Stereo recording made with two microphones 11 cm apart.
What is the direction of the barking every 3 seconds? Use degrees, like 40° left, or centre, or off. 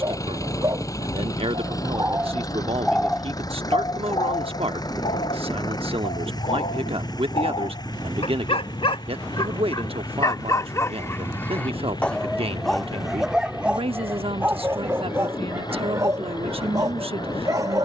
20° right, 50° left, 60° left, 30° left, 10° right, 30° right.